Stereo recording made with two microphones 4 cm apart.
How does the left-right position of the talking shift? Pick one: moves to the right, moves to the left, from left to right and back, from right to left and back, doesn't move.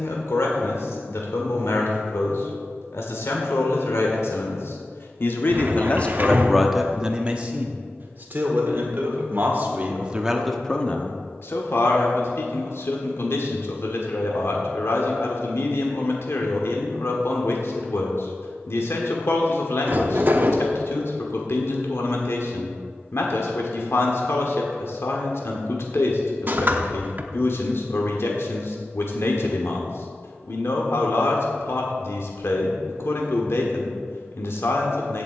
from left to right and back.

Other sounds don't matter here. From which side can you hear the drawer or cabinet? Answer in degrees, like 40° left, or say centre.
40° right.